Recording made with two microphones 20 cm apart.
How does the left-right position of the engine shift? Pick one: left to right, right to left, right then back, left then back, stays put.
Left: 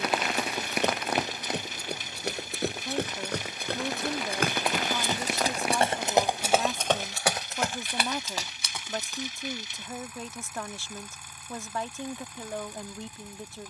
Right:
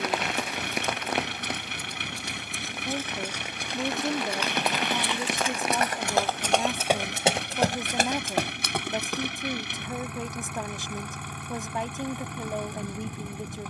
stays put.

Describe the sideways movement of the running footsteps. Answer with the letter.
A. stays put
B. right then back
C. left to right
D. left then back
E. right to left
C.